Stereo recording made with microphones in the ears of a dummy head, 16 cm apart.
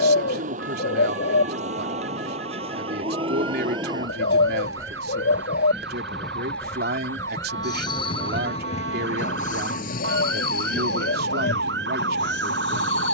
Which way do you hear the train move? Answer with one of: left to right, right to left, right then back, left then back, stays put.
right to left.